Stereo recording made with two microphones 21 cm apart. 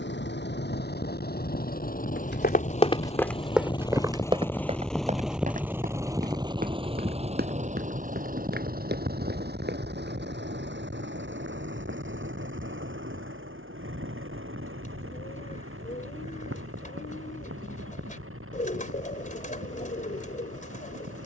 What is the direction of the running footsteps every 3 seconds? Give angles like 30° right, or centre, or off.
40° left, 20° right, 50° right, 50° right, off, off, off.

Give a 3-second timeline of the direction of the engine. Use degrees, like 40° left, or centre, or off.
40° left, 10° left, 30° right, 50° right, 60° right, 70° right, 70° right.